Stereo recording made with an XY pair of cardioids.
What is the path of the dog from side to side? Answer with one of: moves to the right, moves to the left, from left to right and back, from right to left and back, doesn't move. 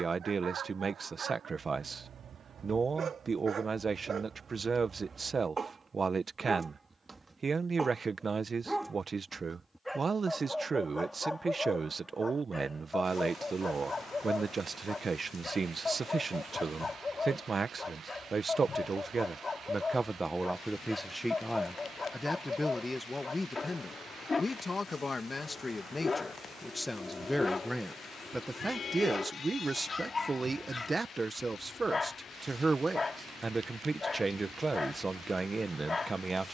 moves to the left.